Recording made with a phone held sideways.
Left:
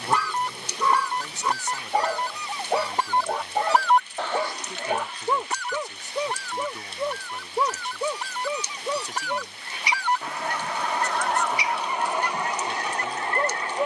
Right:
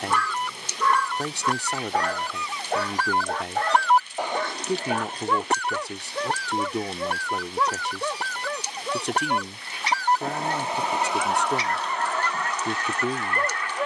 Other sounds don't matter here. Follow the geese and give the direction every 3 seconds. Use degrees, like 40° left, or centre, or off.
30° left, 20° right, 70° right, 20° right, 30° left.